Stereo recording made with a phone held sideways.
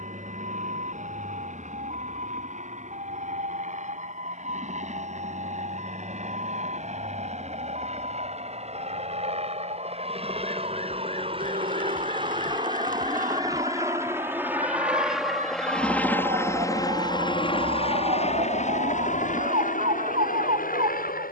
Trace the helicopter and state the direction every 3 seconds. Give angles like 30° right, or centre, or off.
60° right, 60° right, 50° right, 40° right, 20° right, 20° left, 60° left.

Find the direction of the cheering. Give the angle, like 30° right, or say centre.
70° right.